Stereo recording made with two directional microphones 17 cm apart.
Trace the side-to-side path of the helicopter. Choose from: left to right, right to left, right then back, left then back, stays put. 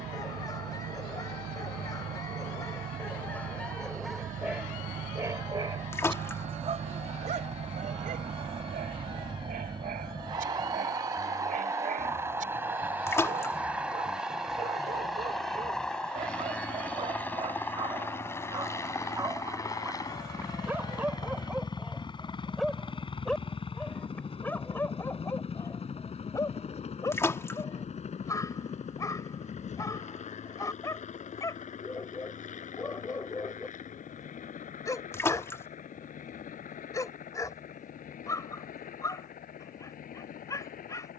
right to left.